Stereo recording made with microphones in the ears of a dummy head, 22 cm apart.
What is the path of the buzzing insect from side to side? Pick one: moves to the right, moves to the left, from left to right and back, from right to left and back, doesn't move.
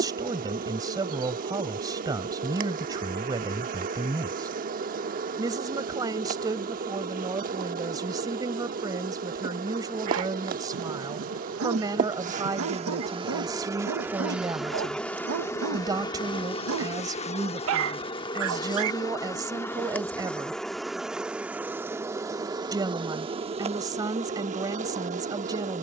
from right to left and back.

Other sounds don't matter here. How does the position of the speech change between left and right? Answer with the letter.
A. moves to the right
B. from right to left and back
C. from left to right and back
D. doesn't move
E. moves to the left
D.